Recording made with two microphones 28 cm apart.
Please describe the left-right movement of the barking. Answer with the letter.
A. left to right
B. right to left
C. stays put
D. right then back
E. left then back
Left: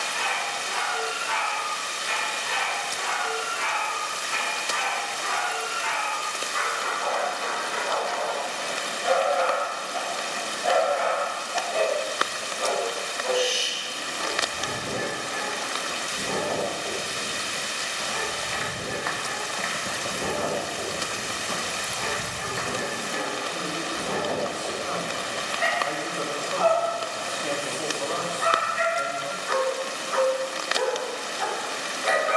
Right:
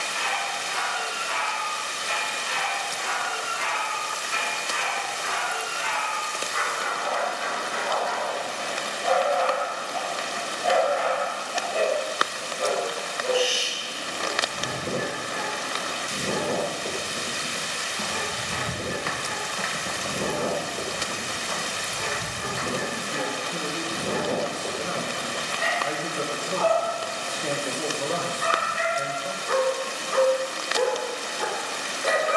A.